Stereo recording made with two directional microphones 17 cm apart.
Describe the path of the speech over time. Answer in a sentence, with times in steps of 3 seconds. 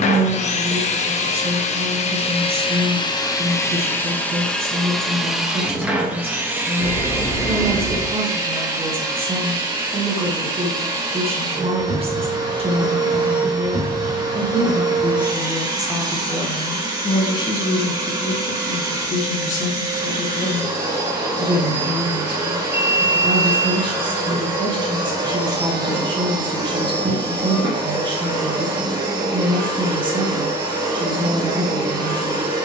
In this clip you hear the speech on the right from 0 s, in the centre from 15 s, on the left from 18 s and on the right from 21 s.